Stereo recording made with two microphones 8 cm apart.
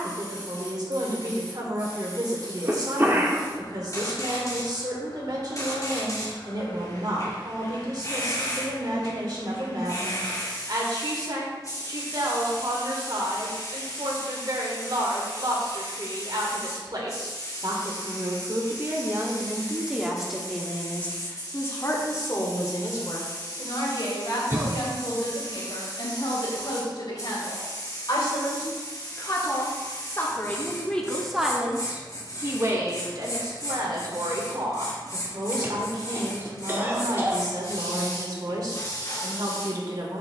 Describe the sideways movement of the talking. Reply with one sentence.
You can hear the talking move from right to left and back again.